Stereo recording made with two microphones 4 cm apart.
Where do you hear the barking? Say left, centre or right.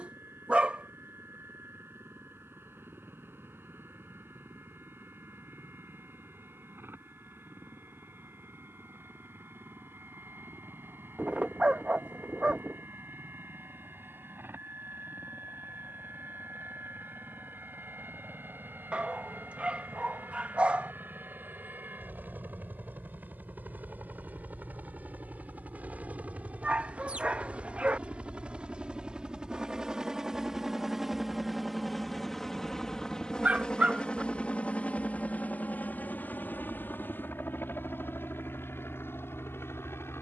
right.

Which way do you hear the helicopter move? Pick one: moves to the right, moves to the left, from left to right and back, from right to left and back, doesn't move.
moves to the left.